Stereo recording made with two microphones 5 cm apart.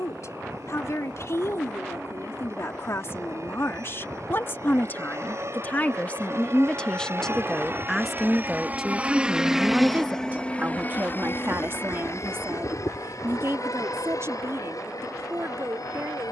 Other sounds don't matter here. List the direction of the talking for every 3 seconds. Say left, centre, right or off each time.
left, left, centre, right, right, right.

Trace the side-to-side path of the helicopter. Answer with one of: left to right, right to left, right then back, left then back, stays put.
right to left.